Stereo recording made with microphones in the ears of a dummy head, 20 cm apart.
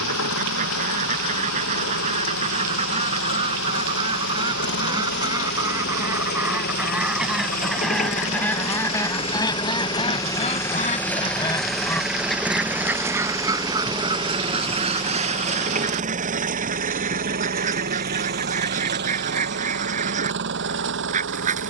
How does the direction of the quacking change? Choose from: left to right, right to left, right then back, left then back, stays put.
left then back.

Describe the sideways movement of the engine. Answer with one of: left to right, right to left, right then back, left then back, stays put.
left to right.